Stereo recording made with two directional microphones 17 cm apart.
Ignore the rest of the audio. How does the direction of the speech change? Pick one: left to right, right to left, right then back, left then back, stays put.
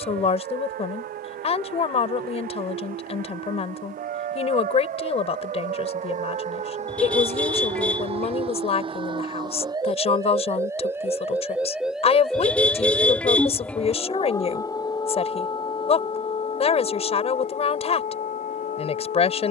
stays put.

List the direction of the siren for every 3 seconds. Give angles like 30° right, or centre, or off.
60° right, 50° right, 40° right, 20° right, 10° left, 30° left, 50° left.